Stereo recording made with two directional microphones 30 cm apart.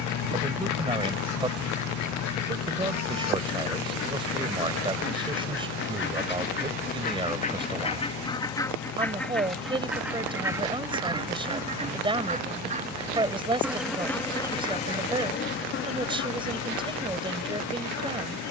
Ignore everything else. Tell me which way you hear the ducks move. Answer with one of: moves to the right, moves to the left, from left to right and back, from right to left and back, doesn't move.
from left to right and back.